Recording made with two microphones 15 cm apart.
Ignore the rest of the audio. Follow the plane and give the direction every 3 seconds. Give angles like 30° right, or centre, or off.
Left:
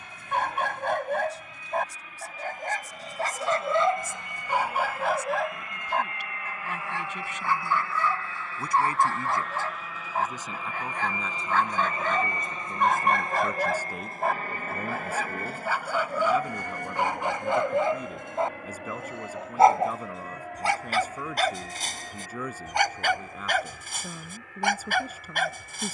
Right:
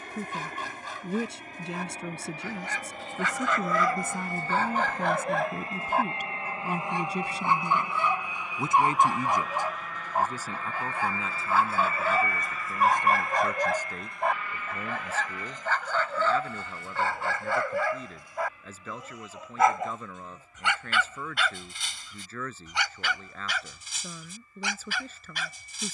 50° right, 40° right, 20° right, 10° left, 30° left, 50° left, 60° left, 70° left, 70° left.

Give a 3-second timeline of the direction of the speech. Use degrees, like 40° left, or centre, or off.
70° right, 60° right, 30° right, 10° right, 10° left, 10° left, 10° left, 10° left, 10° left.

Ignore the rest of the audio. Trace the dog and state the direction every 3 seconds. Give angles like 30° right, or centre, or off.
60° left, 20° left, 20° right, 10° right, centre, 20° left, 30° left, 50° left, 60° left.